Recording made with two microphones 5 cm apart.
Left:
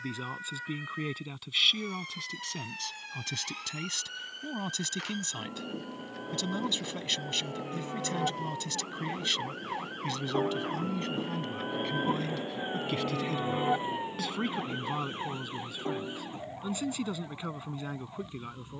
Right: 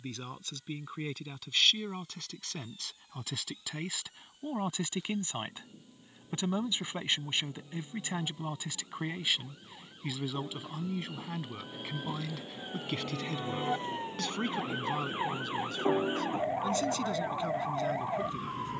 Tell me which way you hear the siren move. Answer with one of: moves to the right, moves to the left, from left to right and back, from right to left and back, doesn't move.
moves to the right.